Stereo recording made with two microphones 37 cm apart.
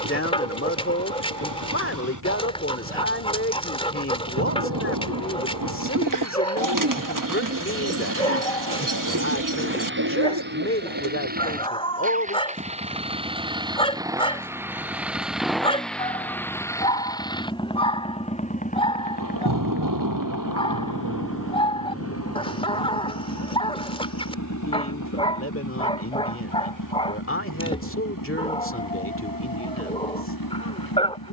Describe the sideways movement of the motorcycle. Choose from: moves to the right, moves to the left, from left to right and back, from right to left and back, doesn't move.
moves to the left.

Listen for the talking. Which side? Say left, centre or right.
left.